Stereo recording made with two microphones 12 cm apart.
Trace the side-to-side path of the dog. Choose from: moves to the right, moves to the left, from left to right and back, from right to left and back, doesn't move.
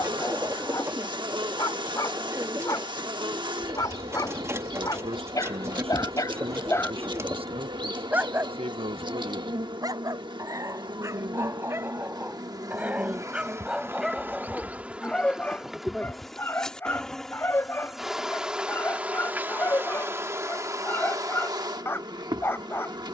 from left to right and back.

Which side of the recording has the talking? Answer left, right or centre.
right.